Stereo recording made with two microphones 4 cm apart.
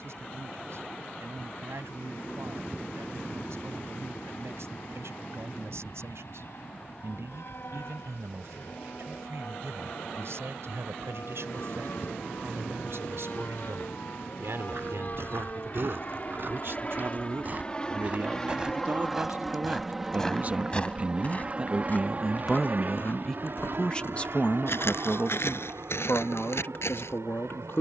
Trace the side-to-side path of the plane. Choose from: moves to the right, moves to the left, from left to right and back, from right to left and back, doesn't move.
moves to the right.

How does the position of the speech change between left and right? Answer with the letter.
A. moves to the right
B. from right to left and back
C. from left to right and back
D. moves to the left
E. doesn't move
D.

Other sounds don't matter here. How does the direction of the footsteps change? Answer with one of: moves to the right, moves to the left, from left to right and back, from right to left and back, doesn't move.
moves to the left.